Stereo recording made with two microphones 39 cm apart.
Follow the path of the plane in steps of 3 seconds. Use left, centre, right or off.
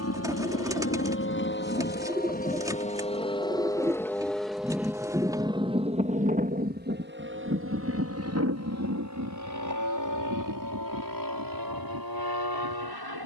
left, centre, right, right, right.